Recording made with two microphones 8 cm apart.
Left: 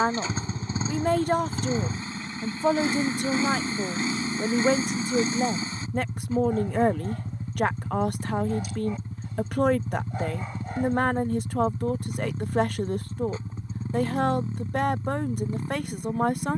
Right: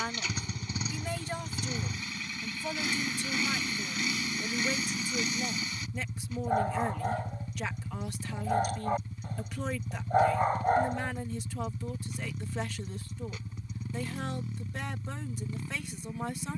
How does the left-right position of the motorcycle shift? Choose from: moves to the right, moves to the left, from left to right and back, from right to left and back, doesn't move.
doesn't move.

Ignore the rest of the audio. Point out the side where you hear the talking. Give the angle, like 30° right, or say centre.
50° left.